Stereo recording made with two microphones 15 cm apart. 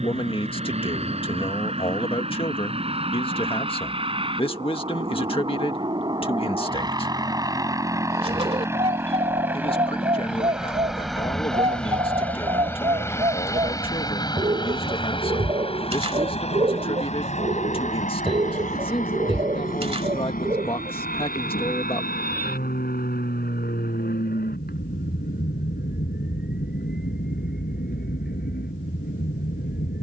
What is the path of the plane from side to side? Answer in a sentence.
You can hear the plane travel towards the left.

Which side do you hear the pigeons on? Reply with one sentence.
You can hear the pigeons on the right.